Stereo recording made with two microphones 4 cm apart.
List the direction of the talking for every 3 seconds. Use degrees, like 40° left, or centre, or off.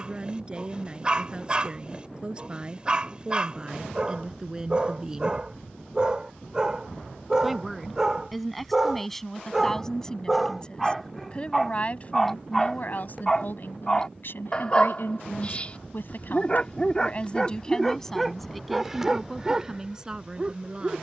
30° right, 20° right, centre, 20° left, 50° left, 40° left, 10° right.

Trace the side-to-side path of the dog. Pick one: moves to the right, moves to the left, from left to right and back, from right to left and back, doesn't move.
from right to left and back.